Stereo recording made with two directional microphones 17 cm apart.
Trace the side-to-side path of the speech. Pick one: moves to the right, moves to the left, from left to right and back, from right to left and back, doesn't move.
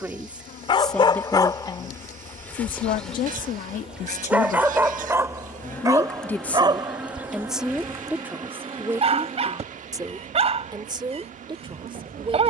from right to left and back.